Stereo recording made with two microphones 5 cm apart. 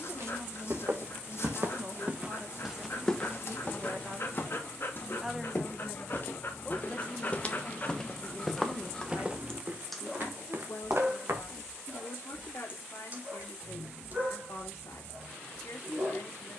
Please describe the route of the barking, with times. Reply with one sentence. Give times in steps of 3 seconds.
In this clip you hear the barking on the left from 0 s, in the centre from 9 s and on the right from 12 s.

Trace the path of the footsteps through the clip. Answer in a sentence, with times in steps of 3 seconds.
In this clip you hear the footsteps on the right from 0 s, on the left from 3 s, on the right from 9 s and not at all from 12 s.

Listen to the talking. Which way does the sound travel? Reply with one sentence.
In this clip you hear the talking go from the right side to the left.